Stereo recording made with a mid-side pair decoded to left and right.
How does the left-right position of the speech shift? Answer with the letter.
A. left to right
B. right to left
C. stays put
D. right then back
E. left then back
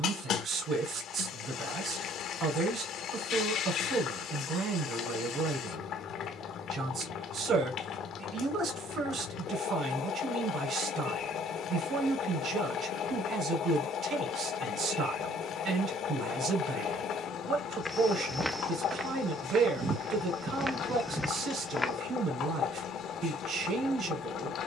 C.